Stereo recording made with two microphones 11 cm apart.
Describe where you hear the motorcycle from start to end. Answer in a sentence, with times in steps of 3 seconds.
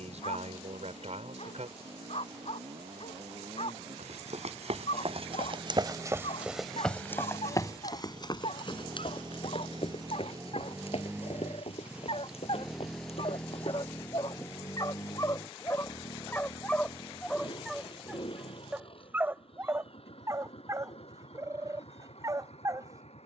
You can hear the motorcycle on the right from 0 s, in the centre from 12 s and on the left from 15 s.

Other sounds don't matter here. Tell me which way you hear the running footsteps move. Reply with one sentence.
You can hear the running footsteps move from right to left.